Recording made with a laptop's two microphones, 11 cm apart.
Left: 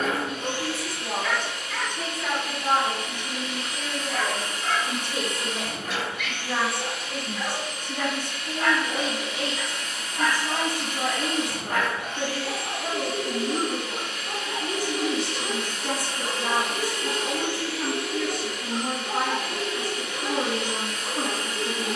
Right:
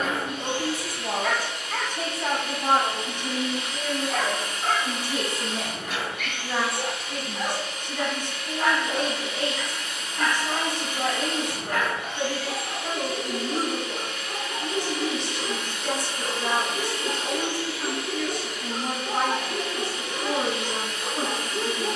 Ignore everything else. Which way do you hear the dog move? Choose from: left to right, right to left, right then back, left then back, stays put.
left then back.